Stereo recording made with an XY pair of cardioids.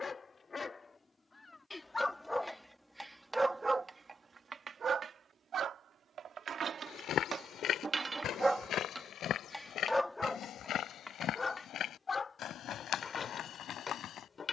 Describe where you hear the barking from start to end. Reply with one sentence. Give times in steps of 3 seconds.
You can hear the barking on the left from 0 s, on the right from 3 s and on the left from 9 s.